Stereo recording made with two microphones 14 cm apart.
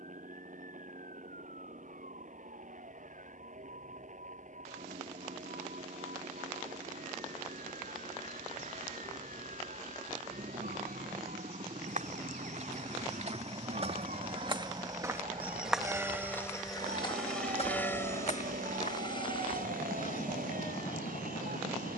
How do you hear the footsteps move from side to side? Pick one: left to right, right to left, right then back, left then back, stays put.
right to left.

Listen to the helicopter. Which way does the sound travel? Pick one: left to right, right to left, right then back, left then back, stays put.
right to left.